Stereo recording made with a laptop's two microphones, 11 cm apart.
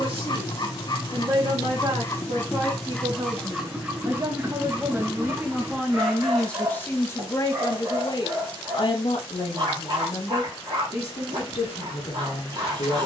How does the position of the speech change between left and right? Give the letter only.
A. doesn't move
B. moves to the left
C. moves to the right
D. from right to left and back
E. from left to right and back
B.